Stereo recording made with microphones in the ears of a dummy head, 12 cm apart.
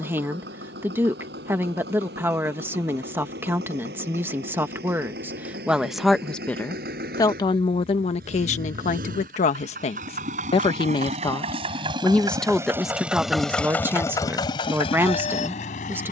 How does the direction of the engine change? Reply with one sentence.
In this clip you hear the engine move to the left.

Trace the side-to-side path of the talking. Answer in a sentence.
You can hear the talking go left and come back.